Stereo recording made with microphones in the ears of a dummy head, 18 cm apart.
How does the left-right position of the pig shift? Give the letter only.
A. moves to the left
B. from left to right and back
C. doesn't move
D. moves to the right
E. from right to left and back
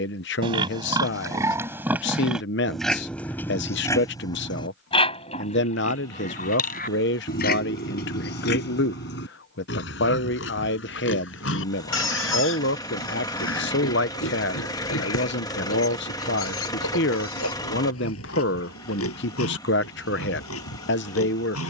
A.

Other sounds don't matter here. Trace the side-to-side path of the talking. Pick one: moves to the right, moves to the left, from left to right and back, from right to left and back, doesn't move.
doesn't move.